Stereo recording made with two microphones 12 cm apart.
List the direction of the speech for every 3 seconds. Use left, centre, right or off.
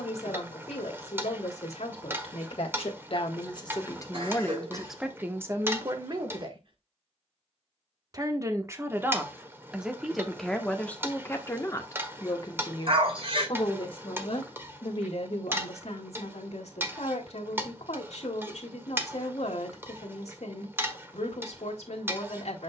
left, centre, right, centre, left, left, left, left.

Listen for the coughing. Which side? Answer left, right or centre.
right.